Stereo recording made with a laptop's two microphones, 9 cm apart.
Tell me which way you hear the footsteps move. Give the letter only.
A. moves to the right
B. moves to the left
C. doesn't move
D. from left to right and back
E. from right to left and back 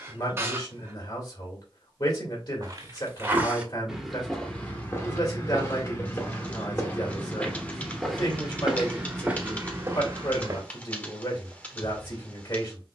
E.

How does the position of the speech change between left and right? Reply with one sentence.
In this clip you hear the speech stay put.